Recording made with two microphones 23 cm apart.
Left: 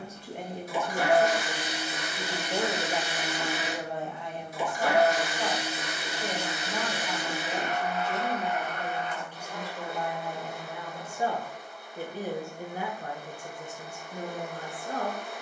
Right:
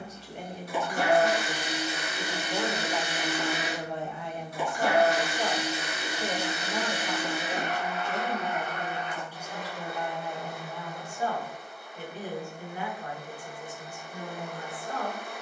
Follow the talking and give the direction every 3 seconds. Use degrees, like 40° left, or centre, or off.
40° left, 10° right, 30° right, 10° left, 40° left.